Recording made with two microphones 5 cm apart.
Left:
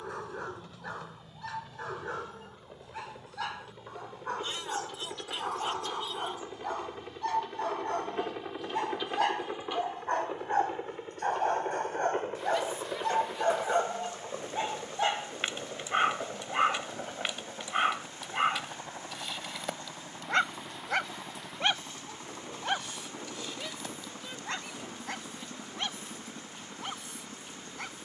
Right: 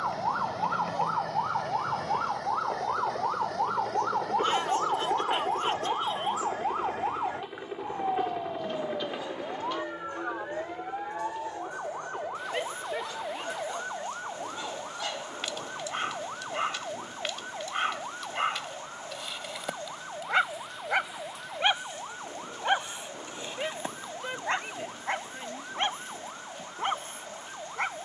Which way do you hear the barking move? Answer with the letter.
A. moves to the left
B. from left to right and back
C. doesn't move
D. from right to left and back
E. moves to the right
E.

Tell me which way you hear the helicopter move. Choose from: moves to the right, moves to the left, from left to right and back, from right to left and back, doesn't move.
moves to the left.